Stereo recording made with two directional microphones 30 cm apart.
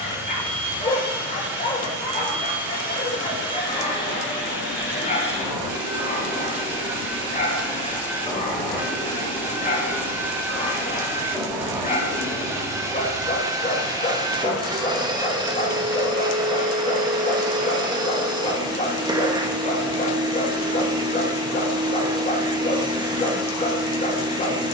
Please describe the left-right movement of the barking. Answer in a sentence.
You can hear the barking stay put.